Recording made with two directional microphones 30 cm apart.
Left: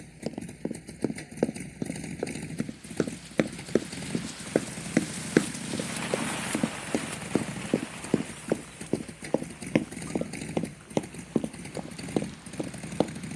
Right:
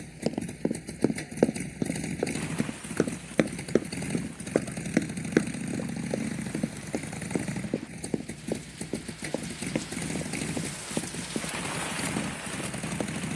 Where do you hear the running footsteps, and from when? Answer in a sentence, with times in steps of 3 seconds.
You can hear the running footsteps on the right from 0 s, in the centre from 3 s and on the left from 6 s.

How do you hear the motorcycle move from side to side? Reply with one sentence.
In this clip you hear the motorcycle stay put.